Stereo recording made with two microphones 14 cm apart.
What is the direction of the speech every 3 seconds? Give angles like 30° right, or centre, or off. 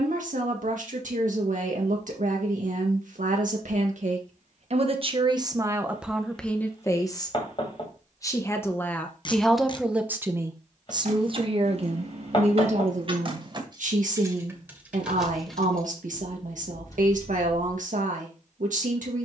70° right, 50° right, 20° left, 20° right, 60° right, 70° right, 70° right.